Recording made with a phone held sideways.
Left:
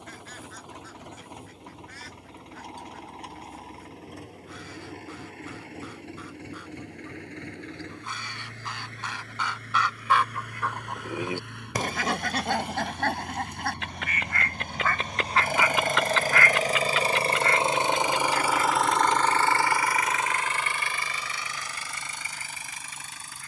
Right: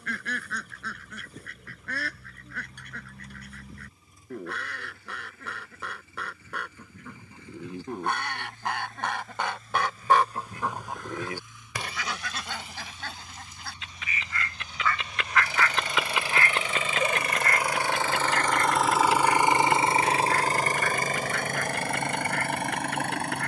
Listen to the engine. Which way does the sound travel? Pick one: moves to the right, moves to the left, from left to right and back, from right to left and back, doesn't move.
moves to the right.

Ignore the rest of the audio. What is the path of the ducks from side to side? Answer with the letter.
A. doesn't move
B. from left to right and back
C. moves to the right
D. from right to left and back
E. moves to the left
D.